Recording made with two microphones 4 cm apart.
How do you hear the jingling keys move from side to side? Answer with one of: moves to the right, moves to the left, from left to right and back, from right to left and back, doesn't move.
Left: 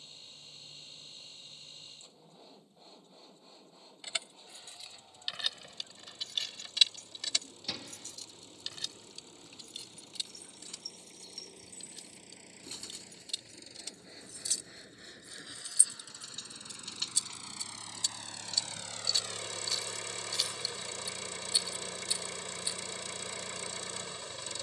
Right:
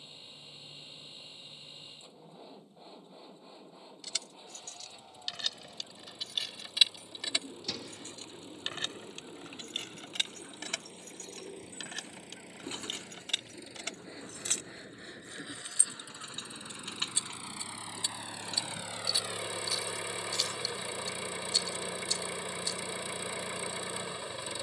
from left to right and back.